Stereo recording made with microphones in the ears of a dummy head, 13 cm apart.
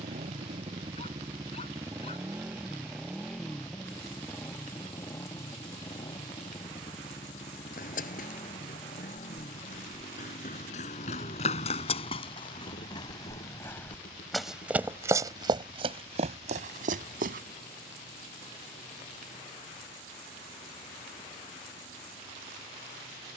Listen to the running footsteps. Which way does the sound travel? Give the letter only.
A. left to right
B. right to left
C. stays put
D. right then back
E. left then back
A.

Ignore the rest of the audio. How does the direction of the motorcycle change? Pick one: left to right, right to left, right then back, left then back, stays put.
right to left.